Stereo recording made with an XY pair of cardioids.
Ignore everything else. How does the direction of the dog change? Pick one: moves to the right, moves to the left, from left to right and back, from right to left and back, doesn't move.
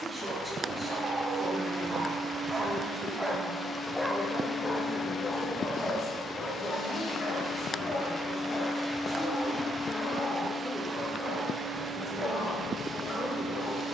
moves to the left.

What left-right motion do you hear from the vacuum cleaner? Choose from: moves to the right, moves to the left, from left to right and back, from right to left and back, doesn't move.
from right to left and back.